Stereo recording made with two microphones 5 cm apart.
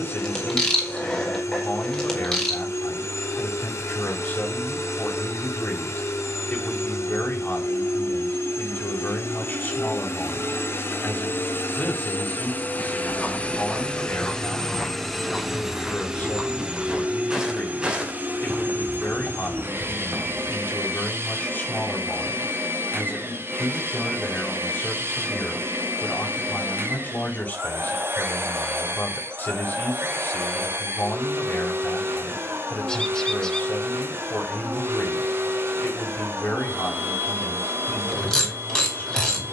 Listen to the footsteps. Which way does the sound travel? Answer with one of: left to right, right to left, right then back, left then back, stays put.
left to right.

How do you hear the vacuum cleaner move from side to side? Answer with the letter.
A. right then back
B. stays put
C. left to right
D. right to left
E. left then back
C.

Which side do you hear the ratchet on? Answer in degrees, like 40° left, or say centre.
10° left.